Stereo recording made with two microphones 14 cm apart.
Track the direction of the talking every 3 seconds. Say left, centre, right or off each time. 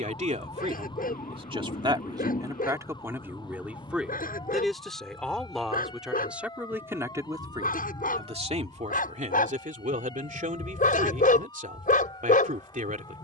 right, centre, right, right, right.